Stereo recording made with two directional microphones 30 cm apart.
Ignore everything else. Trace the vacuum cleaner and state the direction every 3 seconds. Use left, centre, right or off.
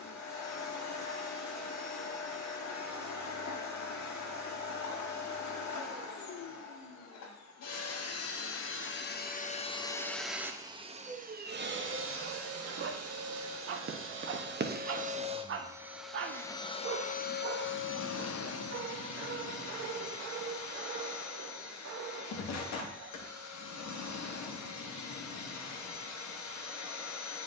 left, left, left, centre, right, centre, left, left, left.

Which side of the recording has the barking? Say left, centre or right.
right.